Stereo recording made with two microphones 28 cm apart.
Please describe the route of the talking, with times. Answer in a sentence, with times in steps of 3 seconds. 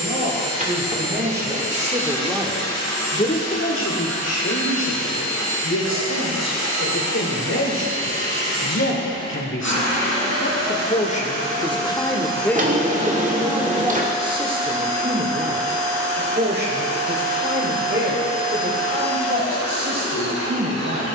You can hear the talking on the right from 0 s, on the left from 3 s, in the centre from 12 s and on the right from 15 s.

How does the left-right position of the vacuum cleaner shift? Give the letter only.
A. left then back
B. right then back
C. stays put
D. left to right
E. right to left
C.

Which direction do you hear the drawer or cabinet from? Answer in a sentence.
In this clip you hear the drawer or cabinet on the right.